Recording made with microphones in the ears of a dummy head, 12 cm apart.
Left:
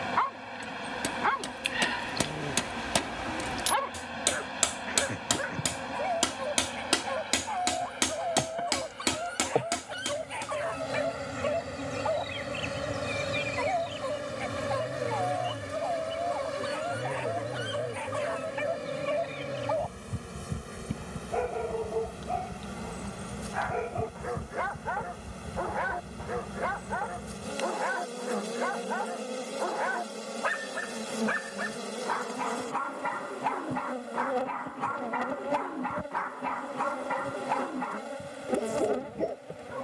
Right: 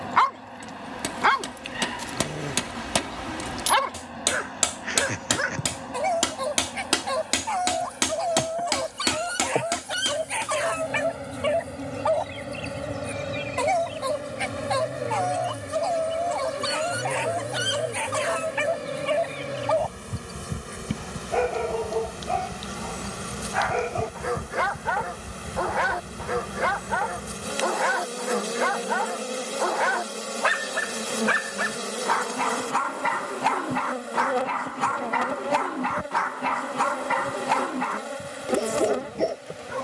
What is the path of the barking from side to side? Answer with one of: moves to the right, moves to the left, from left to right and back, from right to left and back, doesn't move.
doesn't move.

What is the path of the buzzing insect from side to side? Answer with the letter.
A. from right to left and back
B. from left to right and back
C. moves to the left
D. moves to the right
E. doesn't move
D.